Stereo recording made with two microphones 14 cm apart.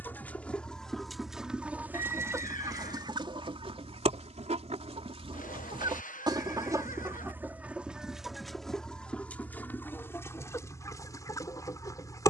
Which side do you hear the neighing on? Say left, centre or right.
left.